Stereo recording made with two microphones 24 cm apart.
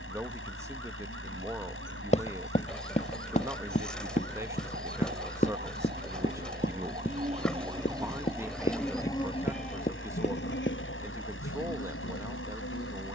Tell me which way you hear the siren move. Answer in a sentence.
You can hear the siren travel towards the left.